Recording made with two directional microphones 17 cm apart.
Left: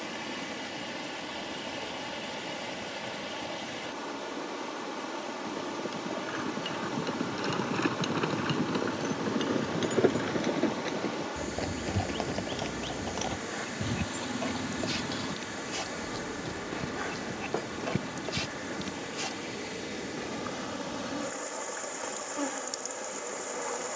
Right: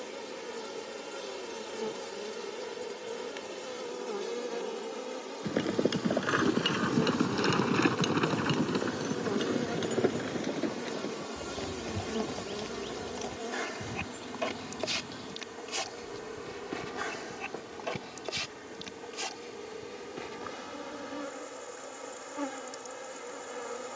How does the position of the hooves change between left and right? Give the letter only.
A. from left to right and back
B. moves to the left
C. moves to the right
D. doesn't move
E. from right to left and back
B.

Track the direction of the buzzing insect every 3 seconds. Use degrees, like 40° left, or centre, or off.
70° right, 70° right, 50° right, 40° right, 20° right, 10° right, 10° left, 10° left.